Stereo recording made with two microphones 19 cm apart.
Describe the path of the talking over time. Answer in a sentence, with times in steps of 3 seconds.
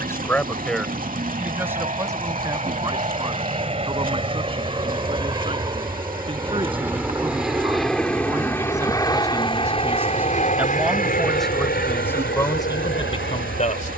In this clip you hear the talking in the centre from 0 s, on the right from 3 s, in the centre from 9 s and on the left from 12 s.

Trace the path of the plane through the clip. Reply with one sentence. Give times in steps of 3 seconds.
You can hear the plane on the right from 0 s, in the centre from 6 s and on the left from 9 s.